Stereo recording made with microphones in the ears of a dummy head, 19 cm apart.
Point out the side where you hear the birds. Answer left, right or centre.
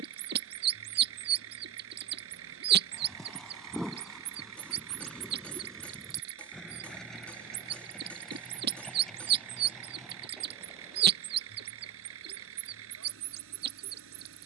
right.